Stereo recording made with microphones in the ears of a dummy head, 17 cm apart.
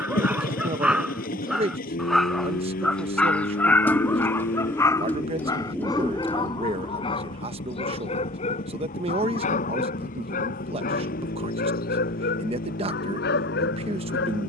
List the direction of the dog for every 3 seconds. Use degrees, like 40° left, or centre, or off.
centre, 10° left, 30° left, 50° left, 60° left.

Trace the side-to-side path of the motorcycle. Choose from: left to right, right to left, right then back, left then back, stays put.
stays put.